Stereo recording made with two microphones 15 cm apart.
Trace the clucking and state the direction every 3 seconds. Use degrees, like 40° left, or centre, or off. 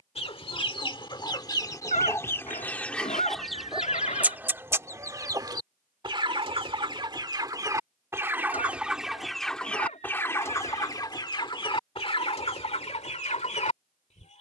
20° left, 10° right, 20° right, 20° left, 40° left.